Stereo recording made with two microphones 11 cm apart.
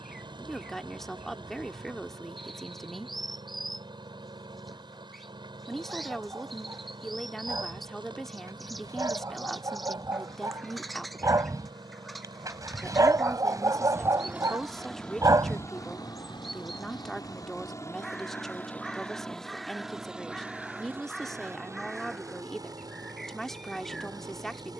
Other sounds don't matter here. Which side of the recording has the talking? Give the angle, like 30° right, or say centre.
centre.